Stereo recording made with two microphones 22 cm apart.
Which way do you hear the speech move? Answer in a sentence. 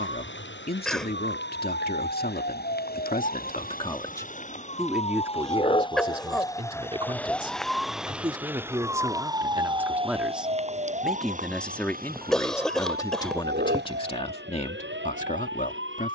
In this clip you hear the speech move from left to right and back again.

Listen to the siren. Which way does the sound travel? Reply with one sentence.
You can hear the siren go from the left side to the right.